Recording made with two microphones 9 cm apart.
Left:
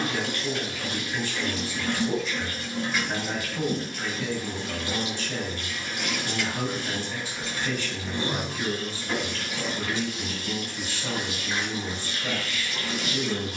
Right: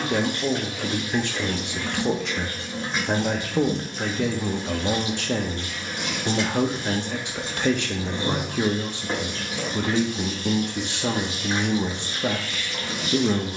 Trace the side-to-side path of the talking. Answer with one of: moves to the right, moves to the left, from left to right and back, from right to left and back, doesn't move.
doesn't move.